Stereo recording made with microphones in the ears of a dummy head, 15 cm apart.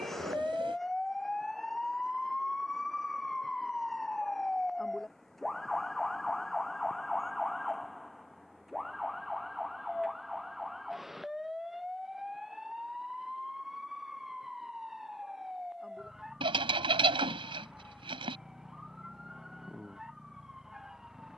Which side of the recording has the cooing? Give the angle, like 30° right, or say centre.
30° right.